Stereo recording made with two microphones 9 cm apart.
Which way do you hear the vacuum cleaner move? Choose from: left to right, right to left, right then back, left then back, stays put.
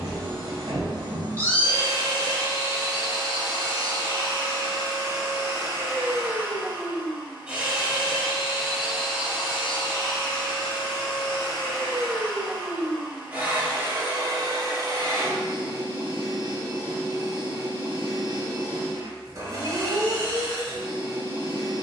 left then back.